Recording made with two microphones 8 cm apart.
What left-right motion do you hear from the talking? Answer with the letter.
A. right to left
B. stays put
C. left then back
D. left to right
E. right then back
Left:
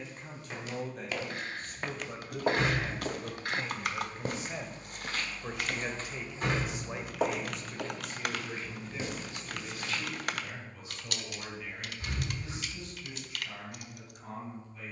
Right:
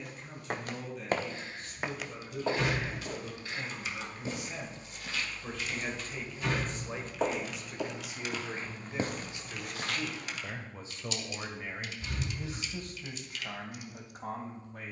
D.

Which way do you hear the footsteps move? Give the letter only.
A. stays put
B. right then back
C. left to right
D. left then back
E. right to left
D.